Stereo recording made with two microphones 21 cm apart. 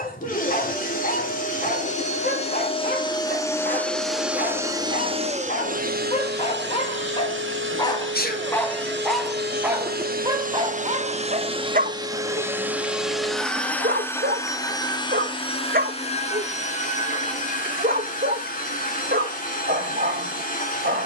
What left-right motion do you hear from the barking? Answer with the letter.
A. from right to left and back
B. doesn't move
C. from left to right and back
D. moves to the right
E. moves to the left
D.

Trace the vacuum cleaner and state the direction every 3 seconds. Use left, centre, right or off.
left, centre, right, right, centre, left, left.